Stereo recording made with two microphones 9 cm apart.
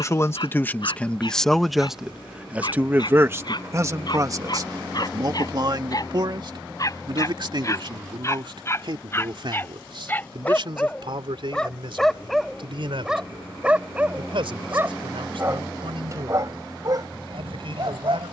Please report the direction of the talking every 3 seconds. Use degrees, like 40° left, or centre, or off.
10° left, 40° right, 60° right, 60° right, 70° right, 70° right.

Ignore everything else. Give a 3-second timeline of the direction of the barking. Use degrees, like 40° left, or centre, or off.
60° left, 50° left, 40° left, 20° left, 10° right, 40° right.